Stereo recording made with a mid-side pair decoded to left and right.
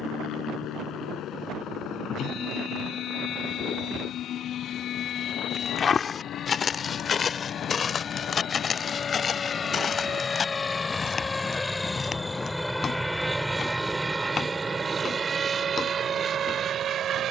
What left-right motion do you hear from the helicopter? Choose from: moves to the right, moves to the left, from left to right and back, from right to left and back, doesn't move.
moves to the right.